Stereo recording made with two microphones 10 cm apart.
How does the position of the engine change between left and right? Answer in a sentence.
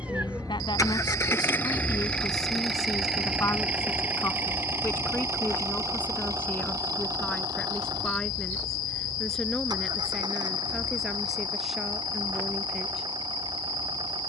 In this clip you hear the engine move to the right.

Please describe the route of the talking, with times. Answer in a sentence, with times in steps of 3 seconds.
You can hear the talking on the left from 0 s and in the centre from 6 s.